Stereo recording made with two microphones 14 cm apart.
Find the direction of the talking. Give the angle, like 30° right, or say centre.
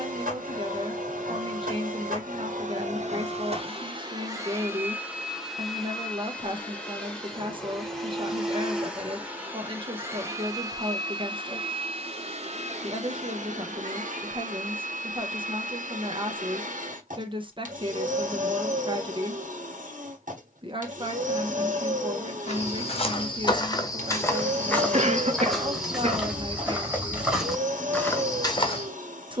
30° right.